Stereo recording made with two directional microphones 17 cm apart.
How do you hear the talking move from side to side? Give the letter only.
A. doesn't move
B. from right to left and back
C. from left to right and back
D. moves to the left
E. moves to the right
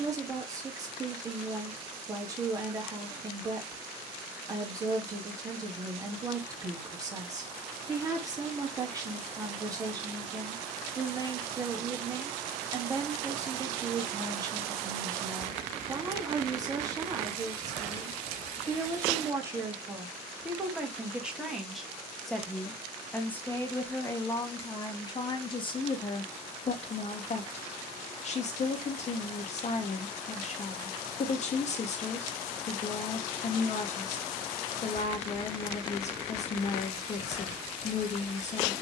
D.